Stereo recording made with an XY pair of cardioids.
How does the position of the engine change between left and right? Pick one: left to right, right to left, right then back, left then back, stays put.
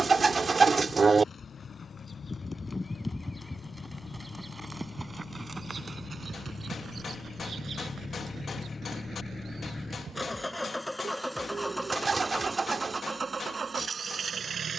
left to right.